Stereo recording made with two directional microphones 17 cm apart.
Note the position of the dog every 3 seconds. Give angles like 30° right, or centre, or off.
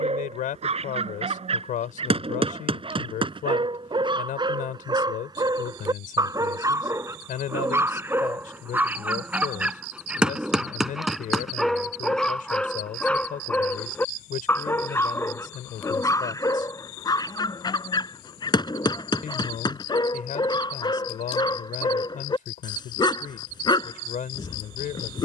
40° right, 30° right, 20° right, centre, 10° left, 20° left, 30° left, 30° left, 30° left.